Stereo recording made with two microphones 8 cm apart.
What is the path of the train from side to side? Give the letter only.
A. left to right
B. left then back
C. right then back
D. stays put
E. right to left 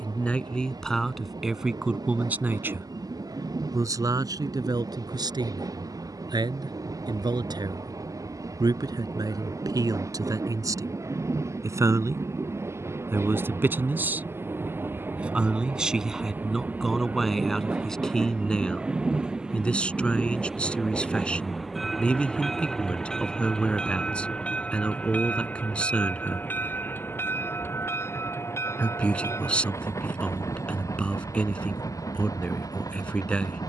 E.